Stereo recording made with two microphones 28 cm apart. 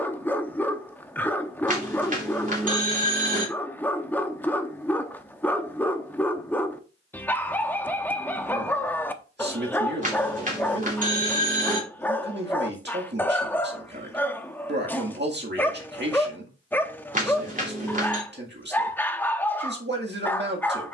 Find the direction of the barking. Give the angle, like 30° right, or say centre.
10° left.